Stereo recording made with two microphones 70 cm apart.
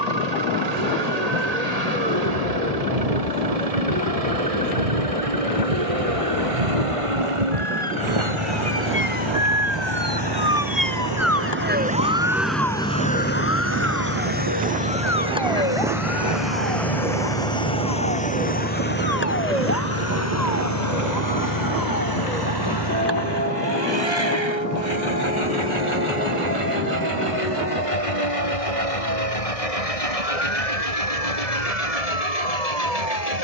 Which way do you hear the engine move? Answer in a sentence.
In this clip you hear the engine travel towards the left.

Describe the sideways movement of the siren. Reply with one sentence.
You can hear the siren move to the left.